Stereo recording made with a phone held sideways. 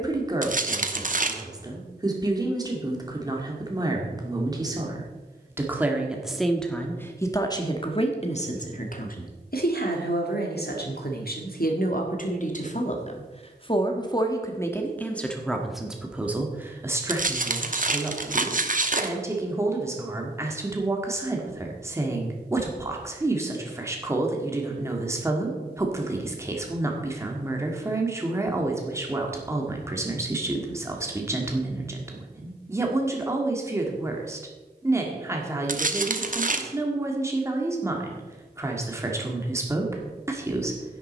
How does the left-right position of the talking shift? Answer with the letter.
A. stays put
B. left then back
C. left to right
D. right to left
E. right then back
B.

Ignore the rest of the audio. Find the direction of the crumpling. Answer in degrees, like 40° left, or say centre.
50° right.